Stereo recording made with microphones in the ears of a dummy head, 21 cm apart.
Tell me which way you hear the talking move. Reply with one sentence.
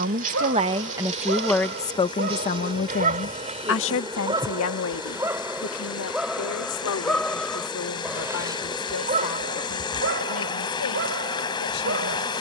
In this clip you hear the talking go from the right side to the left.